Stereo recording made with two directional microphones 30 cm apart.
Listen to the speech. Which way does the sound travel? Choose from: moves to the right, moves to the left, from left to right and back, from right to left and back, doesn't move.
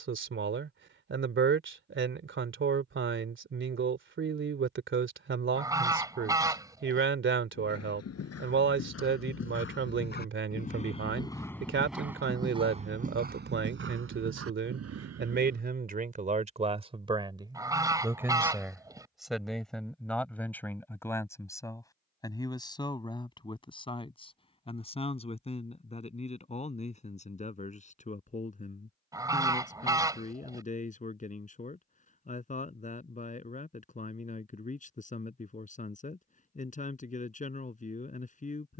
moves to the left.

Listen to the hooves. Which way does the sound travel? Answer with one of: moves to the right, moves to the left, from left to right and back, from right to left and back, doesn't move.
moves to the right.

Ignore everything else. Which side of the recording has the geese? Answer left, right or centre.
centre.